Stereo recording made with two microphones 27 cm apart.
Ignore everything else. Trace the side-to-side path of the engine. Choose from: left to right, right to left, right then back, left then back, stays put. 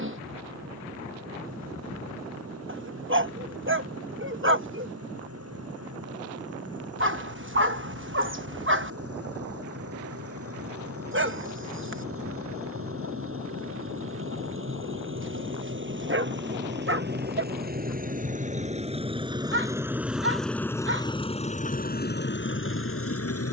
right to left.